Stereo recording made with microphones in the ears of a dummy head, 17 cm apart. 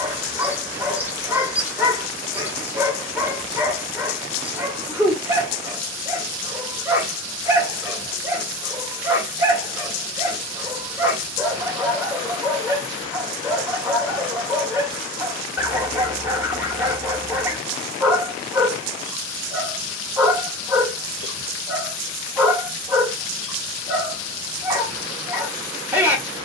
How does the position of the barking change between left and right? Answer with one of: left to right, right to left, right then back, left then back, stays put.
stays put.